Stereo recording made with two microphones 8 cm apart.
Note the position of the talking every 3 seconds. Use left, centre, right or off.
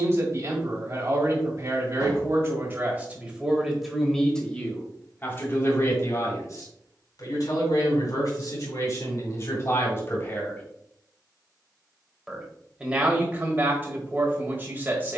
right, centre, left, left, right.